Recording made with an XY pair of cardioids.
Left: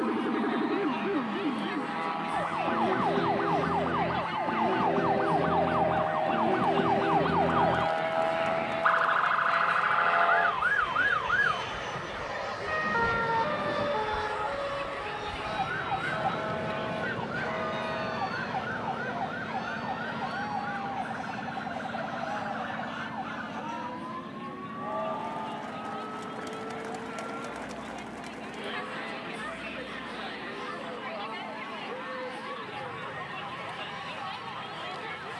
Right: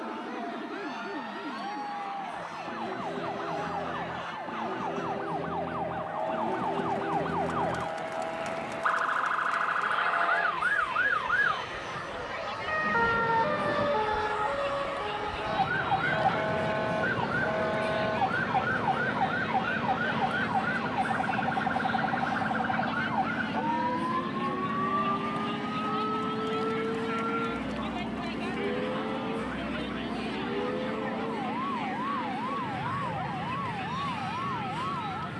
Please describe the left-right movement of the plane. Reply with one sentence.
You can hear the plane go from the left side to the right.